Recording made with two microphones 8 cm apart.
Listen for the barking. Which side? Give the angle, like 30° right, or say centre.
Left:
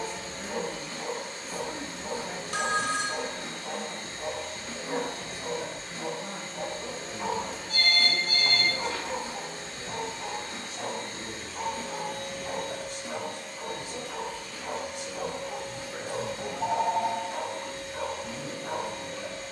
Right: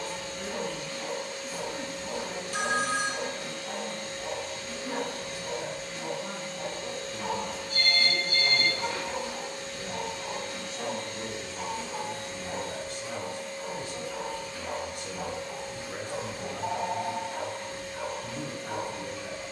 30° left.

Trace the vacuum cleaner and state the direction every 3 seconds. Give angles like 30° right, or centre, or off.
30° left, 30° left, 30° left, 30° left, 60° left, 70° left, 70° left.